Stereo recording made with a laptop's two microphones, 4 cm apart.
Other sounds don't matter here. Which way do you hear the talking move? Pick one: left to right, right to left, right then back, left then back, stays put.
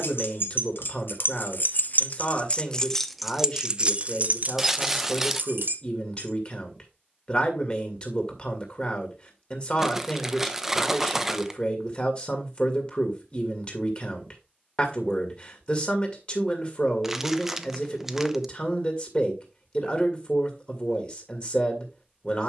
stays put.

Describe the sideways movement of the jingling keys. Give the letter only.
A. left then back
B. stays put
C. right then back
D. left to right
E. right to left
D.